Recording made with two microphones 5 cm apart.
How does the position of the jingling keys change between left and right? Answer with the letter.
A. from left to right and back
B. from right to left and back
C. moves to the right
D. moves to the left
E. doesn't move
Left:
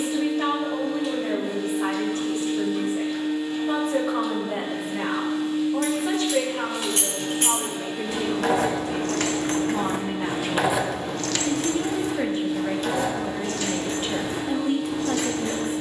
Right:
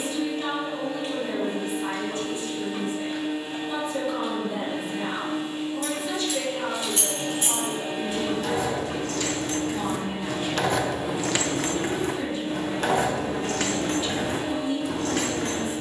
C.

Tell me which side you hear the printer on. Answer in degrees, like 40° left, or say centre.
40° right.